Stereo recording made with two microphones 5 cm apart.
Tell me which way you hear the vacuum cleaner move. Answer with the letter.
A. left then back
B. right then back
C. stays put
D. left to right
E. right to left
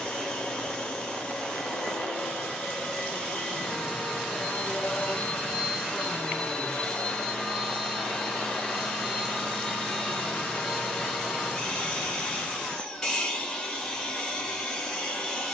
C.